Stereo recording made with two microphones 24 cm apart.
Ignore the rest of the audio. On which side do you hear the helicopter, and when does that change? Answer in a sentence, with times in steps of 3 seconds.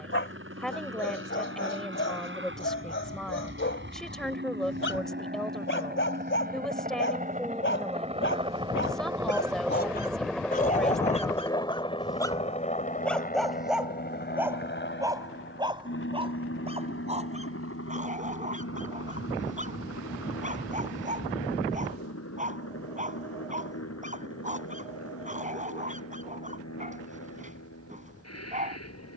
In this clip you hear the helicopter on the right from 0 s, in the centre from 9 s and on the left from 12 s.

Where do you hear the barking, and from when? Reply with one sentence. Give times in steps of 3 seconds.
You can hear the barking on the left from 0 s, in the centre from 12 s and on the right from 15 s.